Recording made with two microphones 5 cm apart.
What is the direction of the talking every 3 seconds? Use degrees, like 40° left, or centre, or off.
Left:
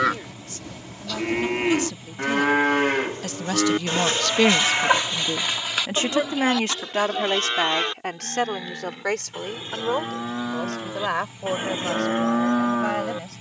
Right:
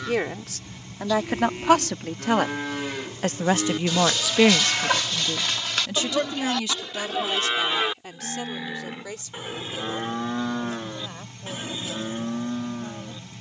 70° right, centre, 50° left, 60° left, 70° left.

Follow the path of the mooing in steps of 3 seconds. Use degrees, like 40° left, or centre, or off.
60° left, 30° left, centre, 10° left, 60° left.